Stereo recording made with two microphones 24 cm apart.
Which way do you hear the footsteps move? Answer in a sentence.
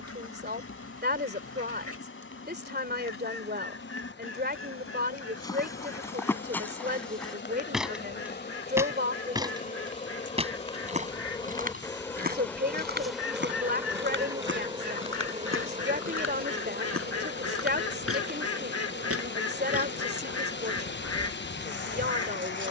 You can hear the footsteps move to the right.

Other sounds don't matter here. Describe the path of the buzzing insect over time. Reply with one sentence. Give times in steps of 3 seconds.
You can hear the buzzing insect on the left from 0 s, in the centre from 12 s and on the right from 15 s.